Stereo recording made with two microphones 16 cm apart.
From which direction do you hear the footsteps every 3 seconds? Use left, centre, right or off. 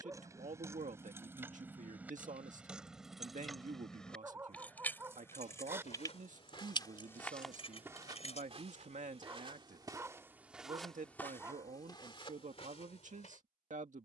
off, left, centre, centre, left.